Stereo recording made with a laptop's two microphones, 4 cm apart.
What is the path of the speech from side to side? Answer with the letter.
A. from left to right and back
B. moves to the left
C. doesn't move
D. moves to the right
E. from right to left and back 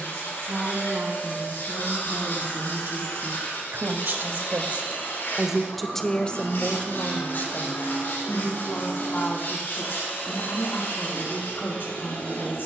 B.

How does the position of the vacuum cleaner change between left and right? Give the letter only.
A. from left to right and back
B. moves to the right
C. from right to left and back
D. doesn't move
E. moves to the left
D.